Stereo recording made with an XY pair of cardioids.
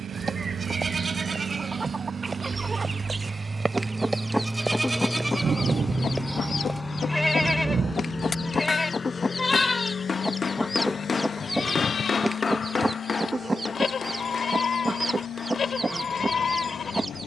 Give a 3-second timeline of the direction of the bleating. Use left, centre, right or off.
right, centre, centre, left, left, left.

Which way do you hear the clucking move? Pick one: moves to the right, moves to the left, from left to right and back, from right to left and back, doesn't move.
from right to left and back.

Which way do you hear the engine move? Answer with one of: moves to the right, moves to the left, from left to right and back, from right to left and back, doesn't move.
moves to the left.